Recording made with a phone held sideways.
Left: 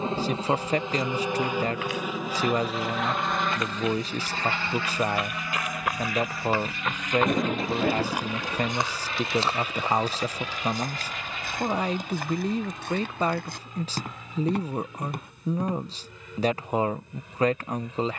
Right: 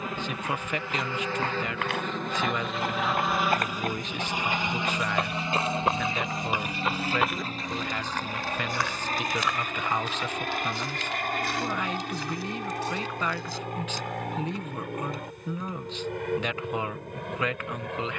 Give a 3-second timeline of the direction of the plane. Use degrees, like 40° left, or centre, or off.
10° left, 10° right, 30° right, 40° right, 50° right, 60° right.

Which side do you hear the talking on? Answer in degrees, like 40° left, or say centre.
40° left.